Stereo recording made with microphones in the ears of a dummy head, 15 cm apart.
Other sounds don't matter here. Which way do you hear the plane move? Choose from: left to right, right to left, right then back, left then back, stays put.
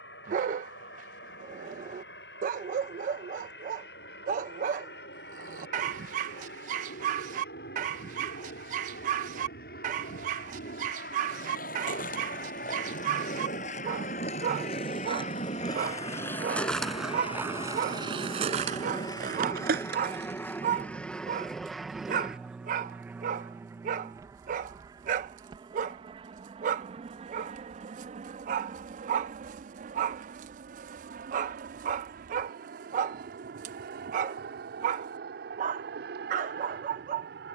left to right.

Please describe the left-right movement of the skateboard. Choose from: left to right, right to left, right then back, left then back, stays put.
left to right.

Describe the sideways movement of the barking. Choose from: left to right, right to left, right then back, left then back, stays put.
stays put.